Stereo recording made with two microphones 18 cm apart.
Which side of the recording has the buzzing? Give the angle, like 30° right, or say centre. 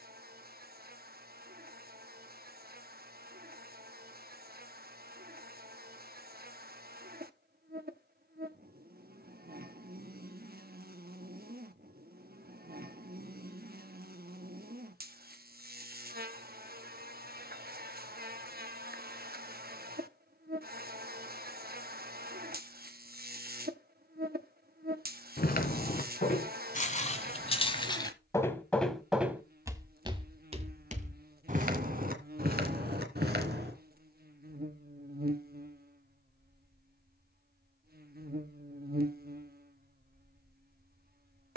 60° right.